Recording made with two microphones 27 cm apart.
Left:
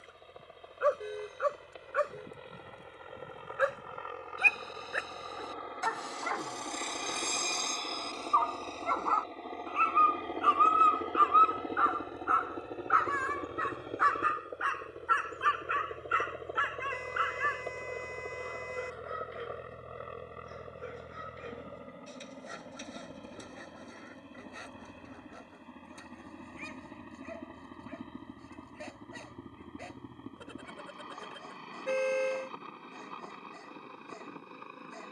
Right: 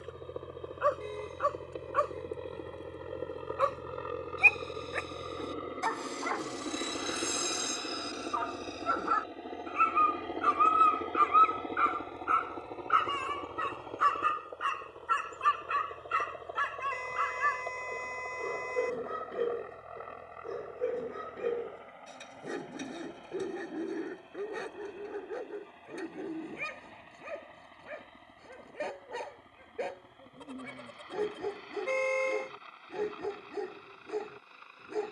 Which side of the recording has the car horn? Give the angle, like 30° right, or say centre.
10° left.